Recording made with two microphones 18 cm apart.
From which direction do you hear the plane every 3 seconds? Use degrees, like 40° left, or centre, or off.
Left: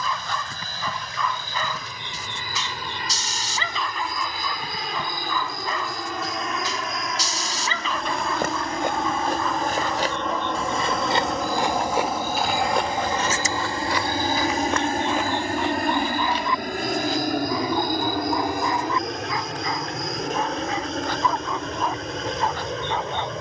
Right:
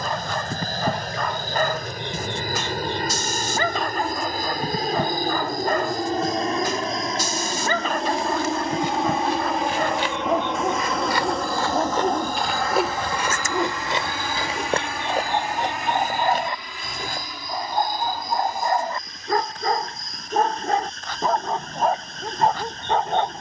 50° right, 40° right, 30° right, centre, 20° left, 50° left, 60° left, 70° left.